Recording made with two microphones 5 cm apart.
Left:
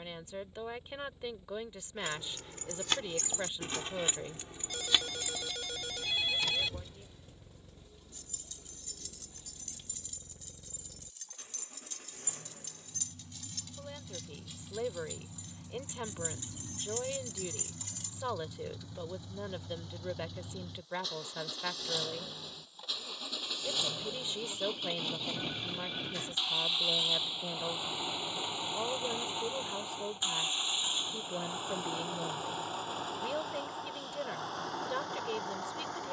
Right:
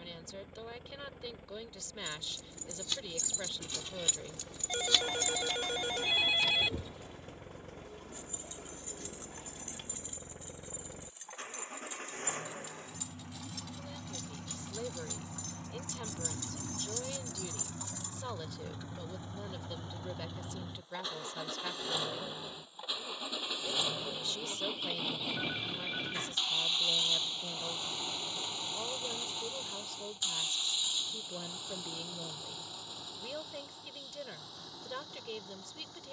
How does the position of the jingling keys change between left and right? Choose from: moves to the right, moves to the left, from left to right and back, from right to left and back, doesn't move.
from left to right and back.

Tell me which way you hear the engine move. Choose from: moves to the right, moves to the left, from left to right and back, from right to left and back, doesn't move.
moves to the left.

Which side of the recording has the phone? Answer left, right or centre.
right.